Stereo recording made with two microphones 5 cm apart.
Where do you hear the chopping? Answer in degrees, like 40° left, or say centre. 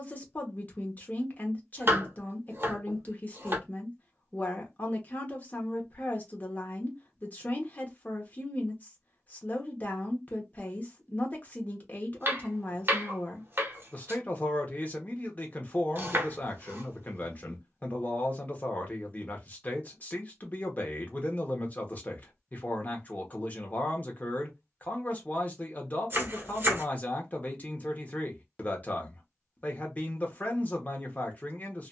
40° right.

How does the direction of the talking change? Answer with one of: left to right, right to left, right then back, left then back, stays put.
stays put.